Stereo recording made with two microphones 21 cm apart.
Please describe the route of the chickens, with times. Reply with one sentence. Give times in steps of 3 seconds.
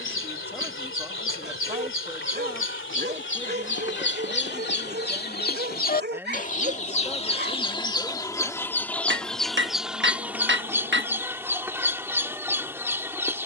You can hear the chickens on the left from 0 s and in the centre from 9 s.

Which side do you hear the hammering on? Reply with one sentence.
You can hear the hammering on the right.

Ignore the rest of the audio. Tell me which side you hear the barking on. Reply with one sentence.
You can hear the barking on the right.